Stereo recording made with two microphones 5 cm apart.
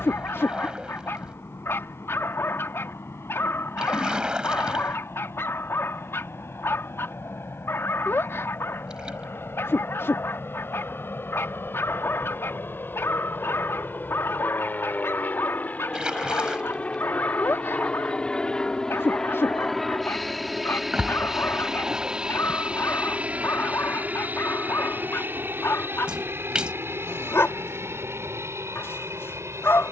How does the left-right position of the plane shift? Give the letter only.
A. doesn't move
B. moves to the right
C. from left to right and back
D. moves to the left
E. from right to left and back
B.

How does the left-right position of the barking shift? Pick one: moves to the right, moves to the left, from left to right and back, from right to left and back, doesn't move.
doesn't move.